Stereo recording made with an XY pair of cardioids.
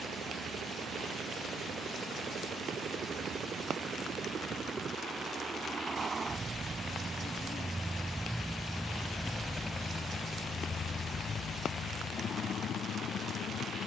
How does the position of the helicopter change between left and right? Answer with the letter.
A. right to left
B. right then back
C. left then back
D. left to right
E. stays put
A.